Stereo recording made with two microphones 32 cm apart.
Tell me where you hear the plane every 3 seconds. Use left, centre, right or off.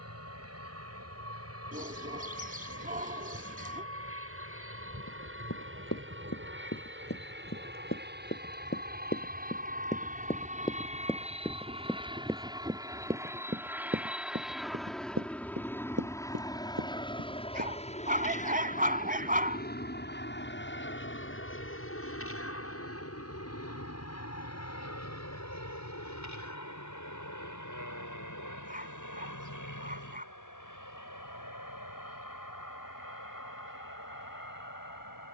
right, right, right, right, centre, centre, left, left, left, left, left, left.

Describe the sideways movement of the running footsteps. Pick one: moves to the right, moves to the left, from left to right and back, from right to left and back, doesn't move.
moves to the right.